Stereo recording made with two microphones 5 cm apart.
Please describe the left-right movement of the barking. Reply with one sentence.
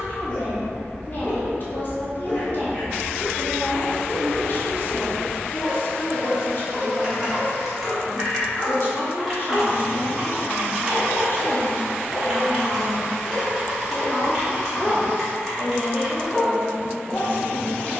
You can hear the barking stay in one place.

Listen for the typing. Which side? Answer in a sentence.
You can hear the typing in the centre.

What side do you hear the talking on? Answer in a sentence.
In this clip you hear the talking on the left.